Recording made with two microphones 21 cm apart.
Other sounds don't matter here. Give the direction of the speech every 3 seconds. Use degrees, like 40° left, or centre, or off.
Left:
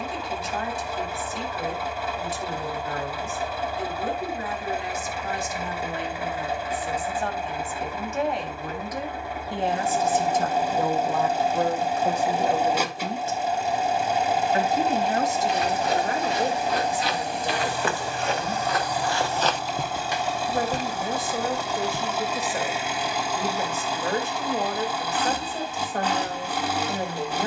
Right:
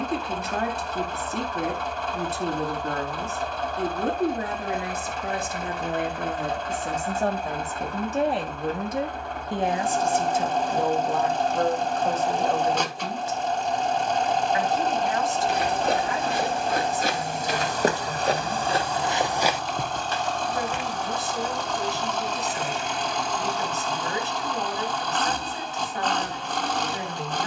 60° right, 60° right, 40° right, 10° right, 20° left, 40° left, 50° left, 50° left, 50° left.